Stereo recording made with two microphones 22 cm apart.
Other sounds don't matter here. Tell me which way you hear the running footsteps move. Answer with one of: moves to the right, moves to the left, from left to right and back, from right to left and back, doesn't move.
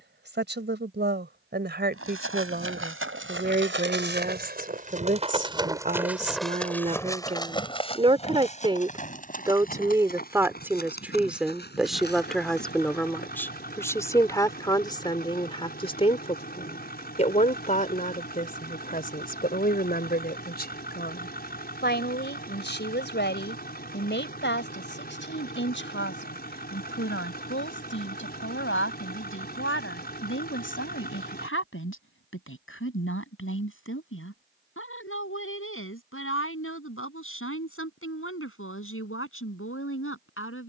moves to the left.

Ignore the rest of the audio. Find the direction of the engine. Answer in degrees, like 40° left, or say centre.
50° left.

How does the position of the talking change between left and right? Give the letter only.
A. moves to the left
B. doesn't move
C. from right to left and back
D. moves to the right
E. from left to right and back
A.